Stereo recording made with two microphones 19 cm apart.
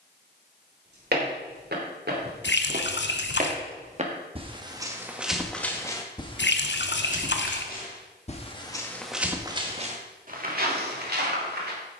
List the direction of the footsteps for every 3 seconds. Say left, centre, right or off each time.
right, right, left, right.